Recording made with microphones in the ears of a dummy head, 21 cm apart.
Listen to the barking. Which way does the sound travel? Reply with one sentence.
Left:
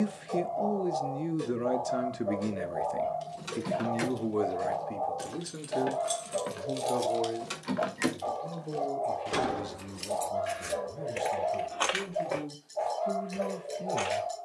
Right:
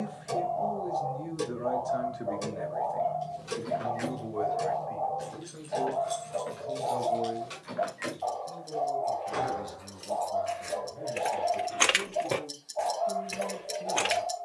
You can hear the barking stay in one place.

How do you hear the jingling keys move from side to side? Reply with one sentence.
You can hear the jingling keys go from the left side to the right.